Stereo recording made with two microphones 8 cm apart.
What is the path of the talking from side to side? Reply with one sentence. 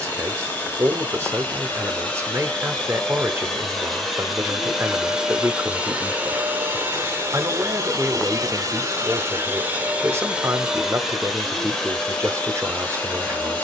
In this clip you hear the talking stay put.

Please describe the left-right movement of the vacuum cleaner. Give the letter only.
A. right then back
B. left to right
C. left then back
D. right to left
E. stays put
A.